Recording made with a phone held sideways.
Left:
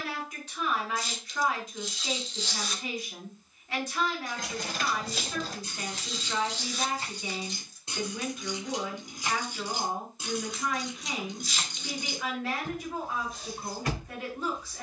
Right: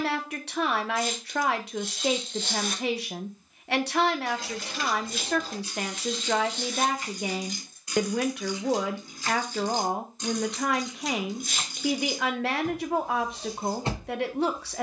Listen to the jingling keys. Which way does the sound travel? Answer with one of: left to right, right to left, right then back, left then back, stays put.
left to right.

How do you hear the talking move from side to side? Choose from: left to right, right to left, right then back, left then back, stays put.
stays put.